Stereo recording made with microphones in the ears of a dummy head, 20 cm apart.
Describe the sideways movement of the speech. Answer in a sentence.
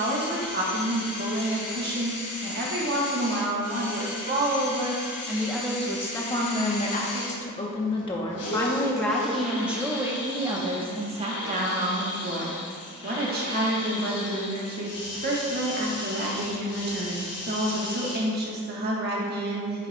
In this clip you hear the speech move from right to left and back again.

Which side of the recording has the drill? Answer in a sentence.
You can hear the drill on the left.